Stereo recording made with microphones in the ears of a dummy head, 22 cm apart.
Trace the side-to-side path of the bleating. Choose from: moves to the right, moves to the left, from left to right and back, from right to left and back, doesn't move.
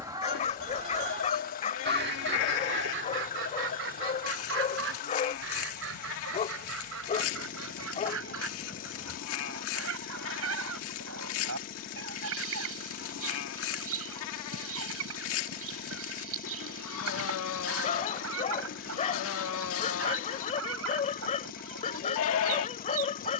doesn't move.